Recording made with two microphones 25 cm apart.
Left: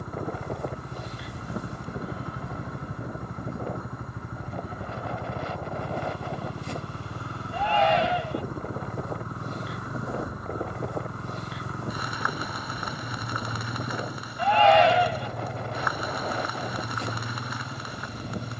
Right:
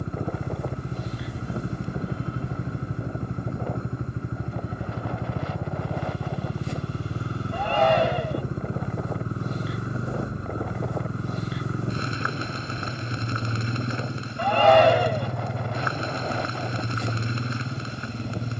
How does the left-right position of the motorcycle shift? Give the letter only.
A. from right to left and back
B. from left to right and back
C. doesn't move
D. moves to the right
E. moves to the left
C.